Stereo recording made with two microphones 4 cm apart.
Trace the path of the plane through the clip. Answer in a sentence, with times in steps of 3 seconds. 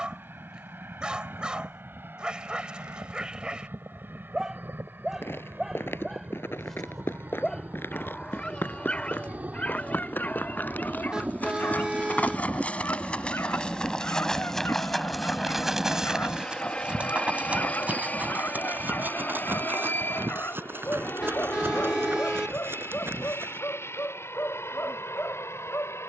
You can hear the plane on the right from 0 s, in the centre from 12 s and on the left from 15 s.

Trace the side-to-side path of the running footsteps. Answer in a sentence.
You can hear the running footsteps travel towards the right.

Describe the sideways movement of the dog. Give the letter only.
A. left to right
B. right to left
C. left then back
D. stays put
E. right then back
B.